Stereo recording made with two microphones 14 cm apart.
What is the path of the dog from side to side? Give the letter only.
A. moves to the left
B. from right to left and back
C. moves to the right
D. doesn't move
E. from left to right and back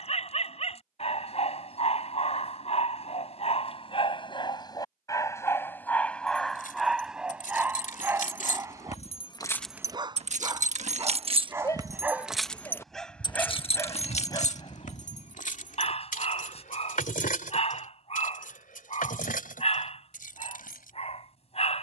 E.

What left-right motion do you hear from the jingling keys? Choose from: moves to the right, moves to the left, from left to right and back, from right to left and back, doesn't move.
from left to right and back.